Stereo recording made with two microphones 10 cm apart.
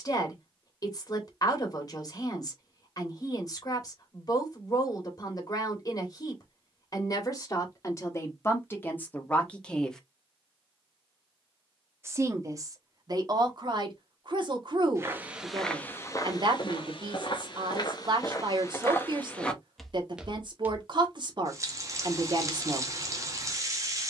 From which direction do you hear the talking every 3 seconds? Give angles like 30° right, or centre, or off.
40° left, 40° left, 30° left, 10° left, 40° right, 50° right, 50° right, 50° right.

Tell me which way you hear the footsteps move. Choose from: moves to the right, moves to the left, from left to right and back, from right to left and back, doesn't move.
from right to left and back.